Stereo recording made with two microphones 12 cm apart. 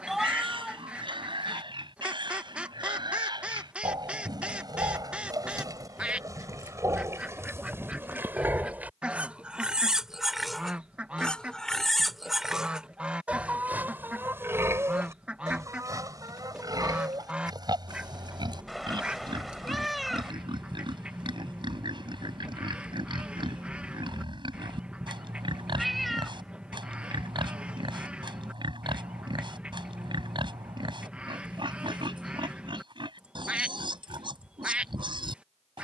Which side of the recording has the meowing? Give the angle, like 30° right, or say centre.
centre.